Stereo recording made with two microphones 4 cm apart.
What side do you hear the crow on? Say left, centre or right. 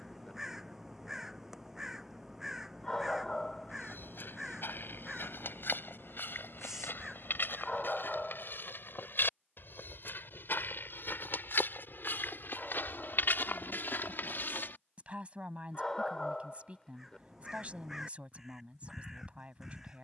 centre.